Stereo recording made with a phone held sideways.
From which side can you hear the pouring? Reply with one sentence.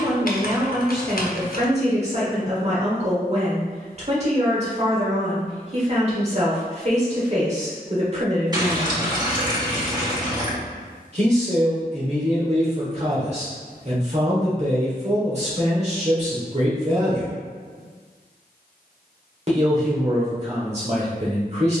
You can hear the pouring on the right.